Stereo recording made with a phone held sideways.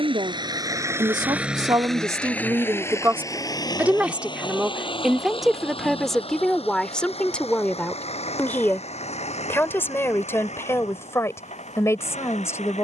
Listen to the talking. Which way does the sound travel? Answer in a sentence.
You can hear the talking move to the left.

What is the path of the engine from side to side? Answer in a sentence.
In this clip you hear the engine move from right to left.